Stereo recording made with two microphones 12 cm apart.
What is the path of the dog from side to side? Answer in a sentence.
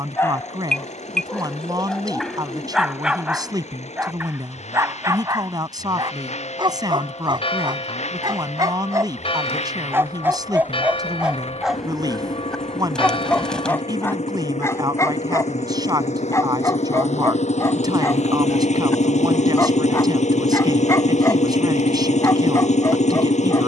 You can hear the dog move from left to right and back again.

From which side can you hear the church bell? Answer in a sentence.
You can hear the church bell on the left.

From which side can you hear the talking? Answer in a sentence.
You can hear the talking on the right.